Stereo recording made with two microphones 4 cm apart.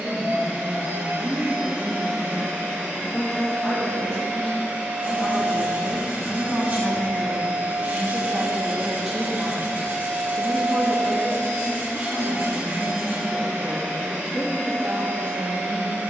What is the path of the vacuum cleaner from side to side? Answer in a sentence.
In this clip you hear the vacuum cleaner stay in one place.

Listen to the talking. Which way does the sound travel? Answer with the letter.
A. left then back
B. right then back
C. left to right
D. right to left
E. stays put
A.